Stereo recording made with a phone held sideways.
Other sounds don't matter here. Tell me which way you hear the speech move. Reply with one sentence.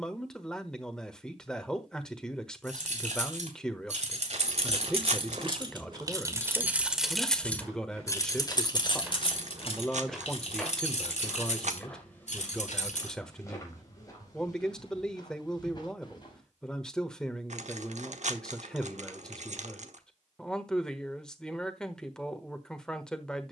In this clip you hear the speech stay put.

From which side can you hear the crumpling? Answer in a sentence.
You can hear the crumpling on the right.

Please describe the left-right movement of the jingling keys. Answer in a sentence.
You can hear the jingling keys go from the right side to the left.